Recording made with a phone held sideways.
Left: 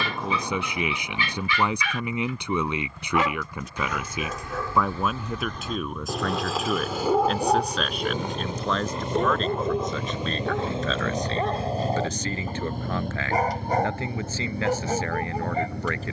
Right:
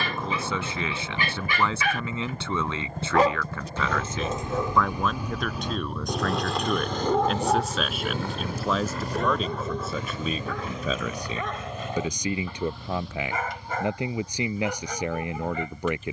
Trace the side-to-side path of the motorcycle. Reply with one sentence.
In this clip you hear the motorcycle move to the left.